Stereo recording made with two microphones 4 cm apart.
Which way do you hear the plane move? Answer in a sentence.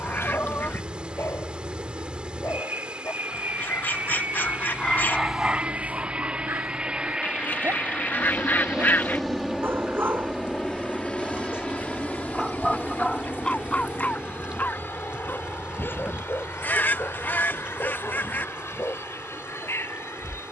You can hear the plane travel towards the left.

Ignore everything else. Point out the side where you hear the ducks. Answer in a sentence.
In this clip you hear the ducks on the left.